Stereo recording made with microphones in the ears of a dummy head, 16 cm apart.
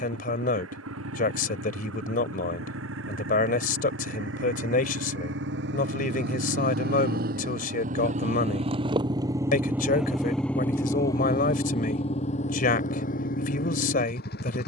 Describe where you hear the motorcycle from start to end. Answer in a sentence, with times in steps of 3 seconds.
In this clip you hear the motorcycle on the right from 0 s, in the centre from 9 s and on the left from 12 s.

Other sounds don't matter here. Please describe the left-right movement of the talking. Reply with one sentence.
You can hear the talking stay put.